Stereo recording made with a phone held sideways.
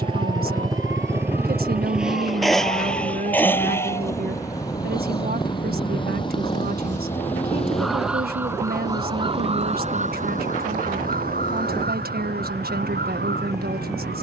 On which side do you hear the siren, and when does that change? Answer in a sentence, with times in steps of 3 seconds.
In this clip you hear the siren on the left from 0 s, in the centre from 6 s and on the right from 9 s.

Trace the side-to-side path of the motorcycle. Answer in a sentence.
You can hear the motorcycle move to the left.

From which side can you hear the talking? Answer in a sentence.
In this clip you hear the talking on the right.